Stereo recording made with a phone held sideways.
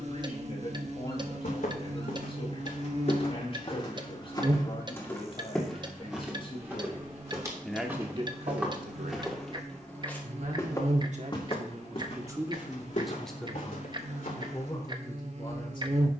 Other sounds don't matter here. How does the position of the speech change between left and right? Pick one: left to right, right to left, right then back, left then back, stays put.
right then back.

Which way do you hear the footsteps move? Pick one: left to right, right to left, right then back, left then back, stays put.
right then back.